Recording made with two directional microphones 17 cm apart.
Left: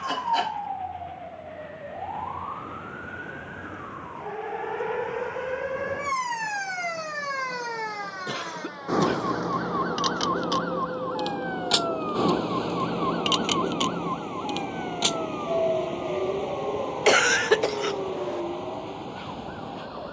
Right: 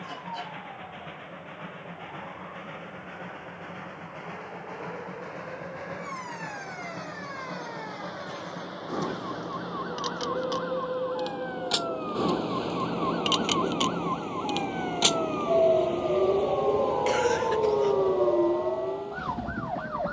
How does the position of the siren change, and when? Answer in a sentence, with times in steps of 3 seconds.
You can hear the siren on the left from 0 s, in the centre from 12 s and on the right from 15 s.